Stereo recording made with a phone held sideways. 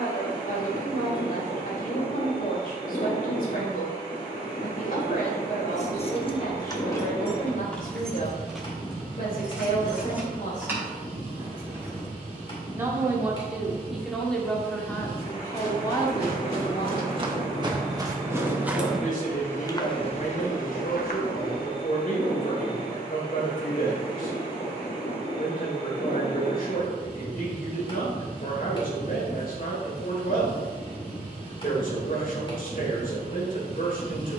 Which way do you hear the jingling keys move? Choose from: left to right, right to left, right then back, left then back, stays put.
left to right.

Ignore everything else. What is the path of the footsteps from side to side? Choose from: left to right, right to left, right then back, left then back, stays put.
right to left.